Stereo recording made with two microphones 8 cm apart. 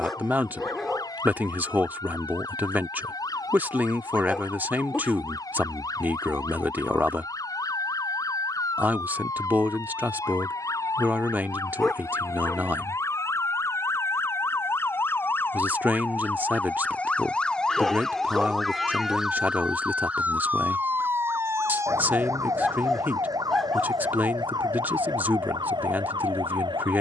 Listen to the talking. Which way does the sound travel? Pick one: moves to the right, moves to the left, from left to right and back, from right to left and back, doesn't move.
doesn't move.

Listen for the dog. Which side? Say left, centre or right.
centre.